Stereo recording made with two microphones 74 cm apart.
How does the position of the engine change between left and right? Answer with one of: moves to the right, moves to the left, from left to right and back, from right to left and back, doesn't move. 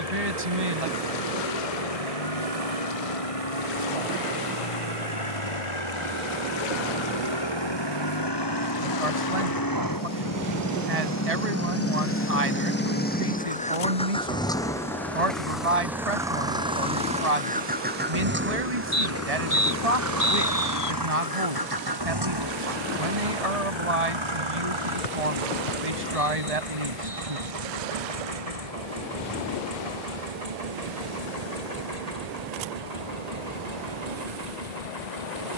moves to the right.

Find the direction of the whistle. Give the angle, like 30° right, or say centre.
70° left.